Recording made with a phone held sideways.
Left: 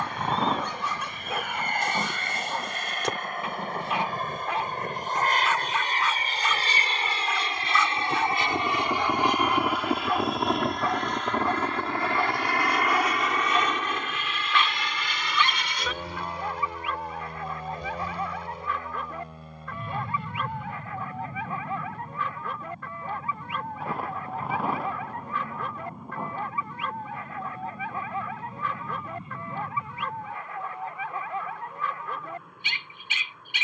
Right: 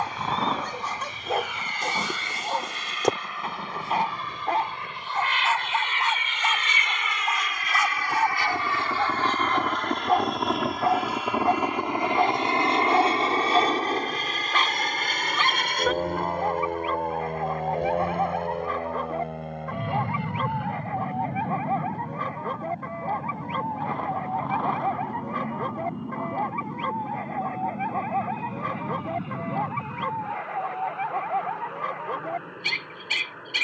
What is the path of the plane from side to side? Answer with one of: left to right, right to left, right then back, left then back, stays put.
left to right.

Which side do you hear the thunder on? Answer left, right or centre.
centre.